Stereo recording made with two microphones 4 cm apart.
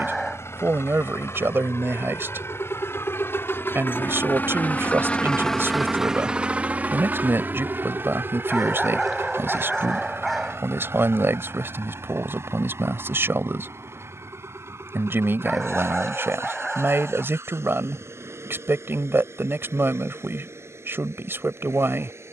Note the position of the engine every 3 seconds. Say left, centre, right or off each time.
left, left, right, right, right, right, right, right.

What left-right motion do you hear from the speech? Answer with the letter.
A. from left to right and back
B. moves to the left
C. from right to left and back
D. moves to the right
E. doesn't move
E.